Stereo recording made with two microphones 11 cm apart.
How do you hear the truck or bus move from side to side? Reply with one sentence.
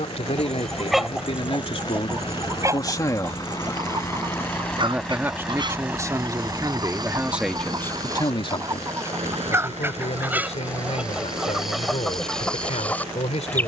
In this clip you hear the truck or bus move to the right.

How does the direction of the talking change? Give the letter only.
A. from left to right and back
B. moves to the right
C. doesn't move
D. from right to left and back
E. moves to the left
A.